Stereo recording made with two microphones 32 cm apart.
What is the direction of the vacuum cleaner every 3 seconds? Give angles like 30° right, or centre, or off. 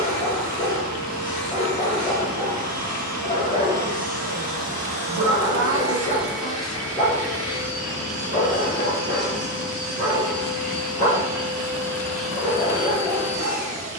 30° right, 20° right, 10° left, 30° left, 10° right.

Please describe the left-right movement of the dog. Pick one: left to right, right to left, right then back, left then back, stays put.
stays put.